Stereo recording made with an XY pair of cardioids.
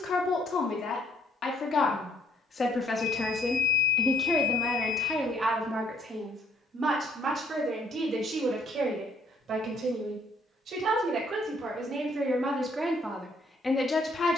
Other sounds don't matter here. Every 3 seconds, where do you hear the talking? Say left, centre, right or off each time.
left, centre, right, right, centre.